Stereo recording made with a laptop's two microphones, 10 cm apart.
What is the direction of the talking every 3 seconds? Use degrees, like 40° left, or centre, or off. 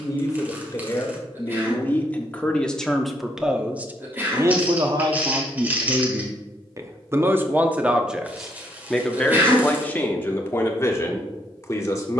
20° left, 30° right, 20° right, 20° left.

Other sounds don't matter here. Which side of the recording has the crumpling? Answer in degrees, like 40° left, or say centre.
20° right.